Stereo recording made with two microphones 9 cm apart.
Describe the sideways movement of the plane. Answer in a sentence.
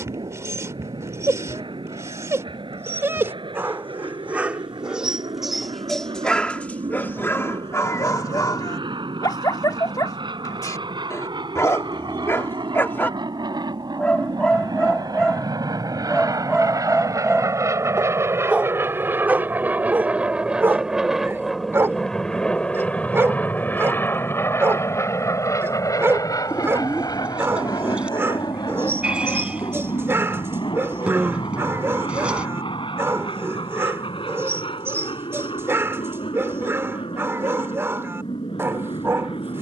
You can hear the plane travel towards the left.